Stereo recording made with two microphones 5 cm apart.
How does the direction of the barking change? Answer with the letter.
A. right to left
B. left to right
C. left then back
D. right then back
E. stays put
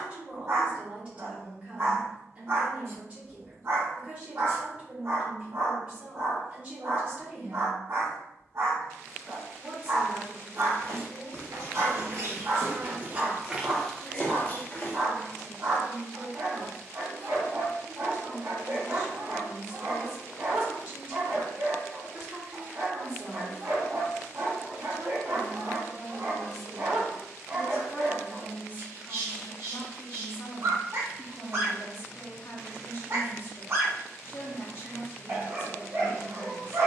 E.